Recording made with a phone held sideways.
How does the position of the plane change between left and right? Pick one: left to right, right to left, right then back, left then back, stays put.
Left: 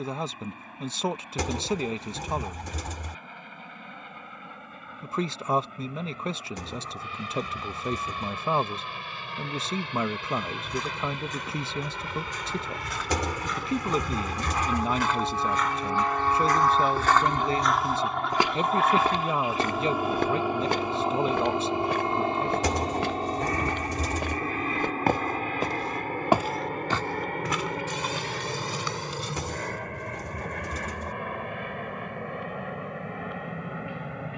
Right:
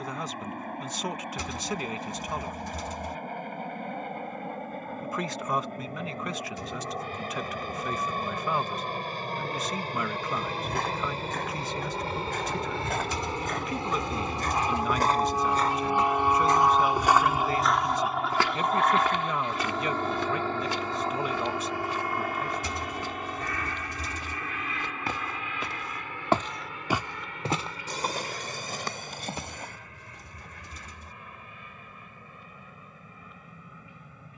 right to left.